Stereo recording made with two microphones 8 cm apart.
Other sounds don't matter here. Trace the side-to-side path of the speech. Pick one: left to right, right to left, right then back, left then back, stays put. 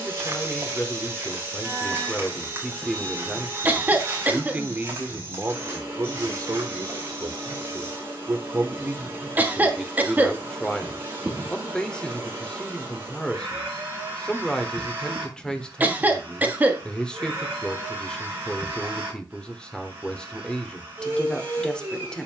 right then back.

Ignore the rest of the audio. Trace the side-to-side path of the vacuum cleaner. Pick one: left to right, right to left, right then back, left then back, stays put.
stays put.